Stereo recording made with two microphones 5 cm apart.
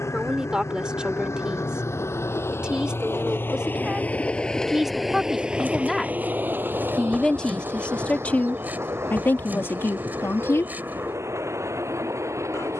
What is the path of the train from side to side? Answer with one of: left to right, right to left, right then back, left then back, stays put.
left to right.